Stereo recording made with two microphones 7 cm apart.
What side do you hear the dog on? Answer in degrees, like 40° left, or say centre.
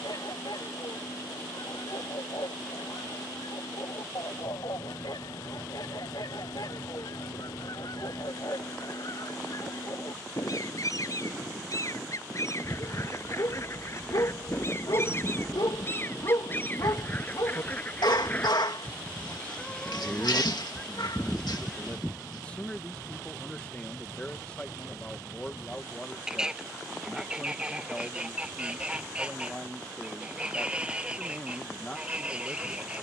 70° left.